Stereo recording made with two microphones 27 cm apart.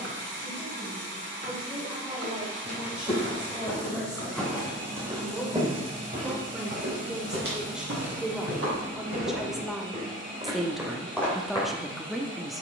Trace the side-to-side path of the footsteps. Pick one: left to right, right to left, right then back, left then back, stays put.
right then back.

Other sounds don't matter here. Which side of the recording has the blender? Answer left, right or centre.
right.